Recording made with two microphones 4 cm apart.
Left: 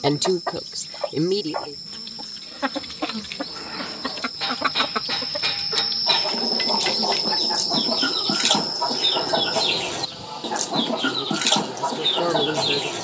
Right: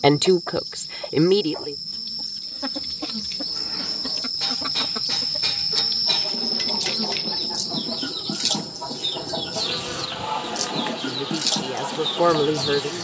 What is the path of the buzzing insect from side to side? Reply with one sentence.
You can hear the buzzing insect move from left to right.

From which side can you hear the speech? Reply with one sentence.
You can hear the speech on the right.